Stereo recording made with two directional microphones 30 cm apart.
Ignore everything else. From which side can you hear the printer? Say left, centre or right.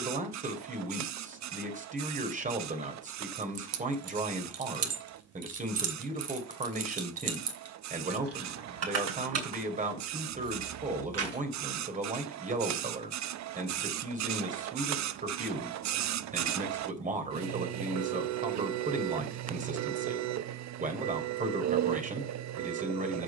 right.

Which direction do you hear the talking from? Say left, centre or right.
right.